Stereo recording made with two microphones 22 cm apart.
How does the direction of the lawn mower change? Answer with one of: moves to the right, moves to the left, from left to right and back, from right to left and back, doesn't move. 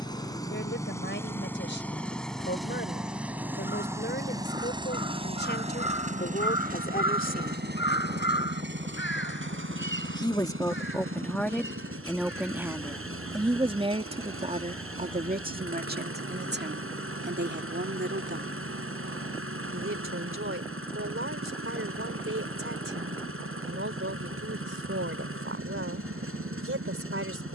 moves to the right.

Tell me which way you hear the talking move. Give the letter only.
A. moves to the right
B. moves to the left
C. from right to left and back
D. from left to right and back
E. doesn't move
A.